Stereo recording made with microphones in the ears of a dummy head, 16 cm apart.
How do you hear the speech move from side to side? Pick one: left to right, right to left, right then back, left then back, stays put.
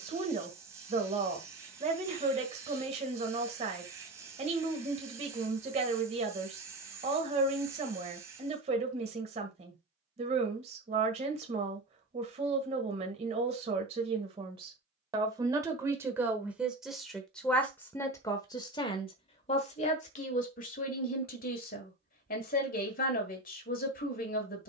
right to left.